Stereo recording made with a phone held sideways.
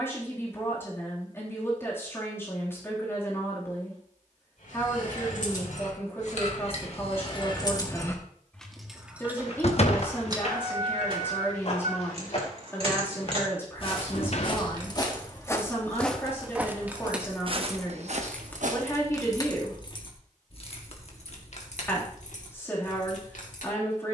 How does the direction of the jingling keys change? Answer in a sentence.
In this clip you hear the jingling keys move from left to right and back again.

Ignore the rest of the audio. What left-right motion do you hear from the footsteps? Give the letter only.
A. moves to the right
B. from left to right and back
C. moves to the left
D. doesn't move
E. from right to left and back
A.